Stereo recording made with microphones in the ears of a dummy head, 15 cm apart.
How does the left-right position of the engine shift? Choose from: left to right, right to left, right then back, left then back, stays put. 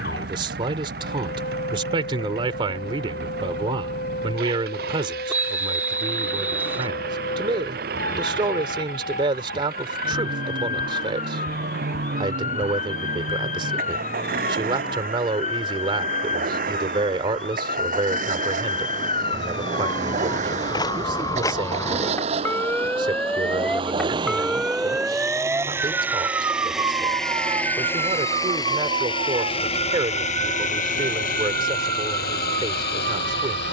right to left.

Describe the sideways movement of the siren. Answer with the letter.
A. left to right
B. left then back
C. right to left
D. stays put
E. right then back
A.